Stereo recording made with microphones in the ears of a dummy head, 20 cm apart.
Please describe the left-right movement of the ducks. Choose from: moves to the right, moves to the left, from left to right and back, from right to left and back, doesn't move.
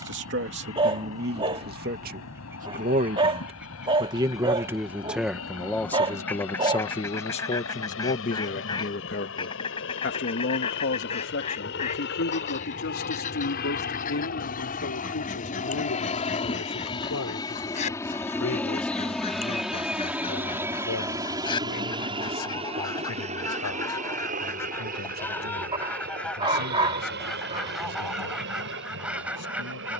from right to left and back.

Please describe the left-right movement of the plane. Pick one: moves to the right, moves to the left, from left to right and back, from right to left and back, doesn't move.
moves to the right.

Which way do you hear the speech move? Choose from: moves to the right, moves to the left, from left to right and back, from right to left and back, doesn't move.
moves to the left.